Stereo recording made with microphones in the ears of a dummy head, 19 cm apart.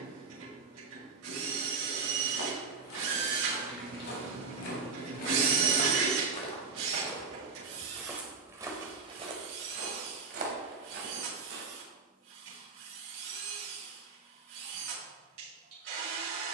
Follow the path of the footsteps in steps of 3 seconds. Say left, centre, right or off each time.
left, left, centre, right, off, off.